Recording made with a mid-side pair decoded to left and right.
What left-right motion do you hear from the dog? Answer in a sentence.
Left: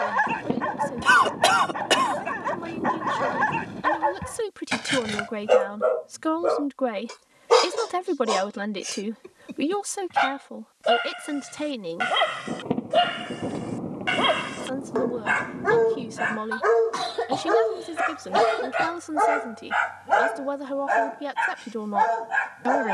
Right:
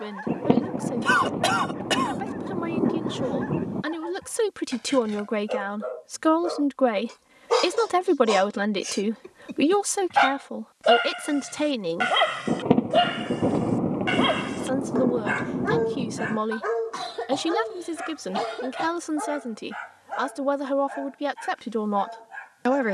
In this clip you hear the dog move from left to right and back again.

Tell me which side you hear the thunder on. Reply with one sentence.
In this clip you hear the thunder on the right.